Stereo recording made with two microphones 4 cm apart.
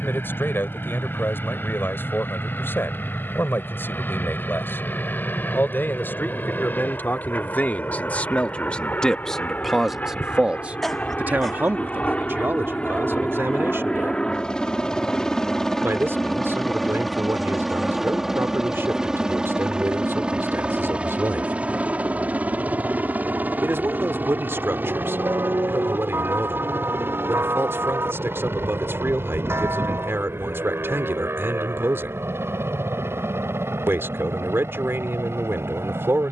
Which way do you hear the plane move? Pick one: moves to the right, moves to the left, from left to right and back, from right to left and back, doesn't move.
moves to the right.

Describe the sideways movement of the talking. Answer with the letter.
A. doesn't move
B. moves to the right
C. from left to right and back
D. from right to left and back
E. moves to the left
B.